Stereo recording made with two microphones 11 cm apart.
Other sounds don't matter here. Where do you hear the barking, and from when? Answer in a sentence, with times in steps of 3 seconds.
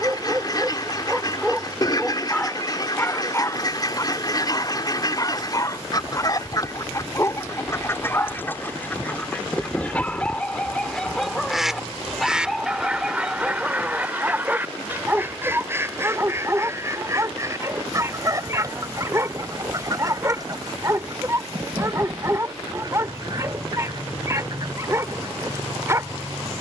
In this clip you hear the barking in the centre from 0 s, on the left from 3 s, in the centre from 9 s and on the right from 15 s.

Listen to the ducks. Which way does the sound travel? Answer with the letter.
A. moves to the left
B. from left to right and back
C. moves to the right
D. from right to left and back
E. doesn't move
C.